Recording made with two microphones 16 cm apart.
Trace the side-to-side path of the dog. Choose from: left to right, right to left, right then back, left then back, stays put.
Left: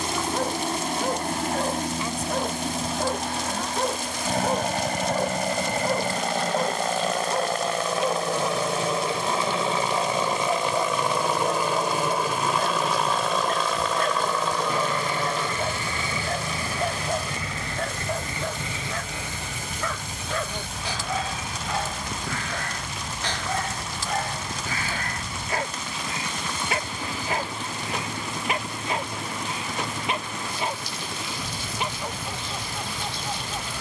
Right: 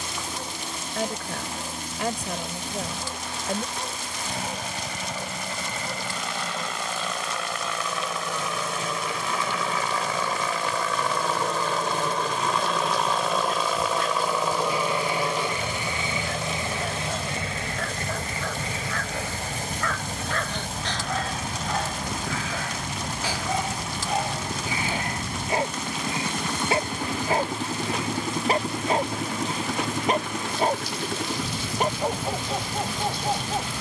left to right.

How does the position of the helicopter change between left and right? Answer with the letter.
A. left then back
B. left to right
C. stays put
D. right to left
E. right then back
B.